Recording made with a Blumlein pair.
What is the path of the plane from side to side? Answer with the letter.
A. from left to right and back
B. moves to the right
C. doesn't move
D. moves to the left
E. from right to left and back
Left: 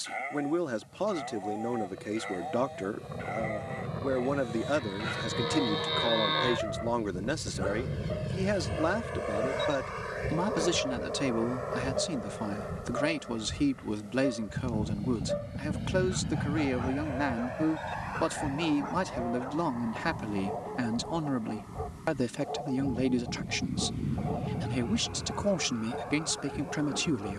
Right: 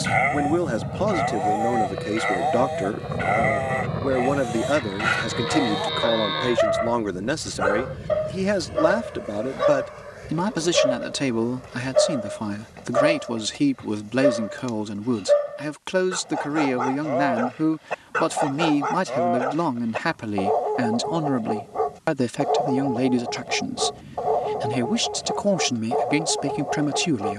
D.